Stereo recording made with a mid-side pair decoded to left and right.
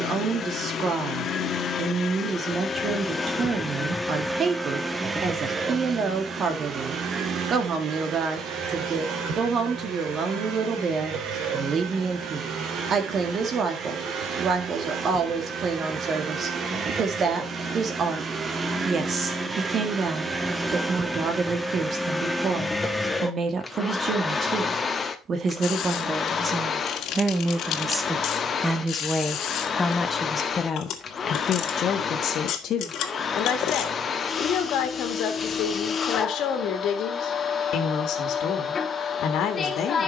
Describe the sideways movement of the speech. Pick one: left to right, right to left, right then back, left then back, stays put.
right to left.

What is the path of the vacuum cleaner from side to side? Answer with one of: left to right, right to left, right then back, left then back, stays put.
right then back.